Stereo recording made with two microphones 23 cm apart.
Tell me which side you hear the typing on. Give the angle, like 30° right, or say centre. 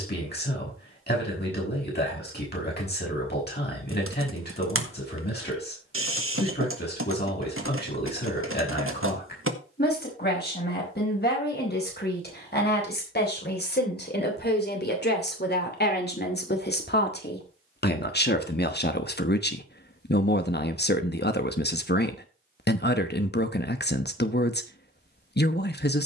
70° right.